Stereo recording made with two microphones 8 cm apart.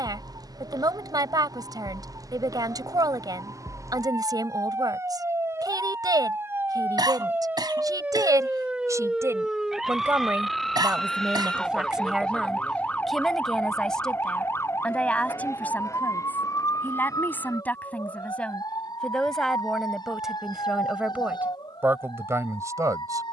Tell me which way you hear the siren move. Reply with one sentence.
You can hear the siren move to the left.